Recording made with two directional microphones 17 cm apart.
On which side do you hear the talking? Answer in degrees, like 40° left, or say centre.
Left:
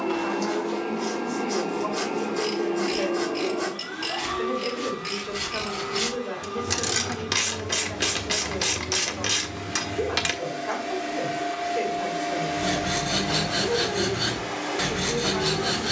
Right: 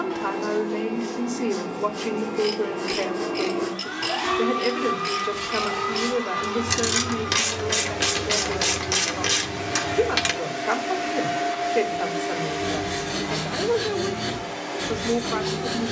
40° right.